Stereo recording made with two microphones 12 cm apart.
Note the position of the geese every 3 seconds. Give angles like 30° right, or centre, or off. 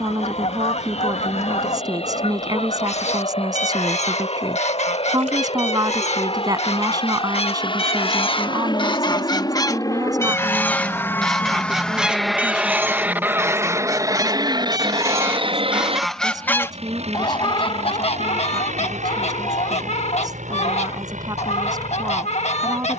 70° left, 70° left, 50° left, 20° left, 20° right, 10° left, 60° left, 60° left.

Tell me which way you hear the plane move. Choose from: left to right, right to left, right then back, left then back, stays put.
left to right.